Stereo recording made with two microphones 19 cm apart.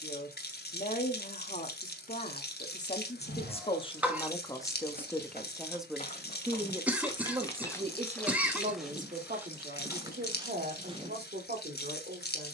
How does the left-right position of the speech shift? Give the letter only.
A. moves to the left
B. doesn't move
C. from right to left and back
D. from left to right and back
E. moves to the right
E.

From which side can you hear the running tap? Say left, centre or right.
left.